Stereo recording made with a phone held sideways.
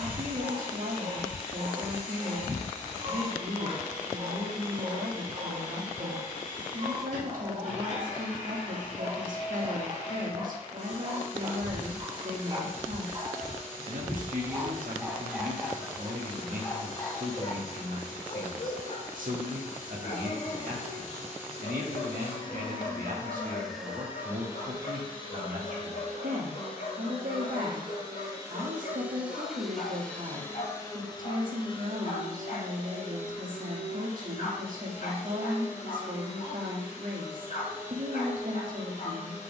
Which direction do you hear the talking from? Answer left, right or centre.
right.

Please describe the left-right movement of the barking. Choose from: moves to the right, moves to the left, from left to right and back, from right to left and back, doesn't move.
moves to the left.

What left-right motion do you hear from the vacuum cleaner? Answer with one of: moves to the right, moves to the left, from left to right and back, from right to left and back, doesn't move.
from left to right and back.